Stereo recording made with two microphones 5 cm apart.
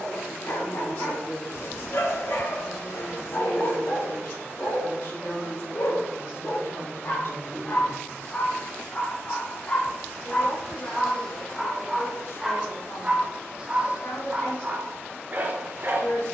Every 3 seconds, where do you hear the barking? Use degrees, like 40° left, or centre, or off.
70° left, 60° left, 40° left, 20° left, 20° right, 40° right.